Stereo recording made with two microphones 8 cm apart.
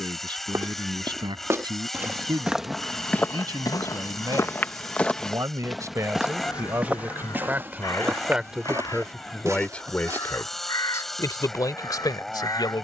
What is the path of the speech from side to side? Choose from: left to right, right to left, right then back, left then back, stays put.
right to left.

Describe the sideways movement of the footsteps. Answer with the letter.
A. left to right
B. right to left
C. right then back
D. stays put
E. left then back
E.